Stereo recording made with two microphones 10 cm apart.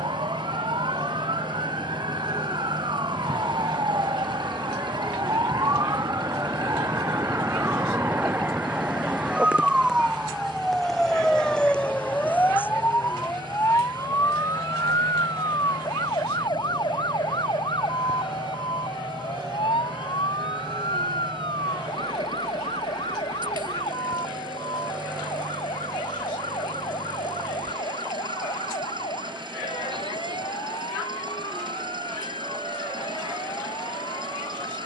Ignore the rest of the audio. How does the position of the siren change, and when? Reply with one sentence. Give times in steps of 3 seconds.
In this clip you hear the siren on the right from 0 s, in the centre from 9 s and on the left from 12 s.